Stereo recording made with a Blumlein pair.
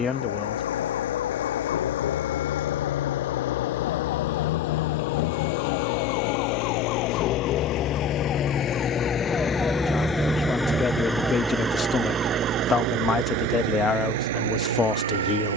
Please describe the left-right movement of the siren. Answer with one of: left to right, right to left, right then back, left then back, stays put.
left to right.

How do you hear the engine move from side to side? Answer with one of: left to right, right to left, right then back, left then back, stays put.
left to right.